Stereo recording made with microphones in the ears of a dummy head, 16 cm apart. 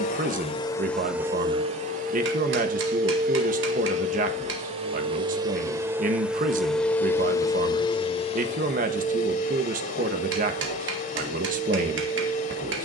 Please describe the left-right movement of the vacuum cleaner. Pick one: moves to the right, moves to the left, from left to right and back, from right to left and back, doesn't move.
from left to right and back.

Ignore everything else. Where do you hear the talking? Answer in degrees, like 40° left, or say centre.
50° right.